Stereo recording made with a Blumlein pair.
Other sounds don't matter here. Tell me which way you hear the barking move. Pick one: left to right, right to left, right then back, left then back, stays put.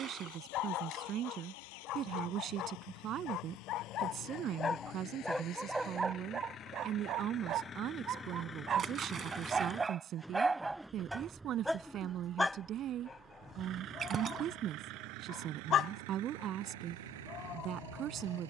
right then back.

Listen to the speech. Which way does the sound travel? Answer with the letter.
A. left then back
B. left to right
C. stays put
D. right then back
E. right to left
C.